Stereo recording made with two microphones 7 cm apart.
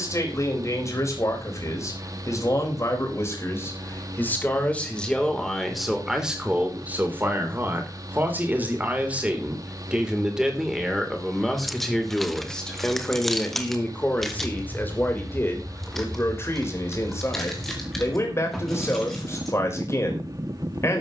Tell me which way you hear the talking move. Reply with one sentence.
In this clip you hear the talking go right and come back.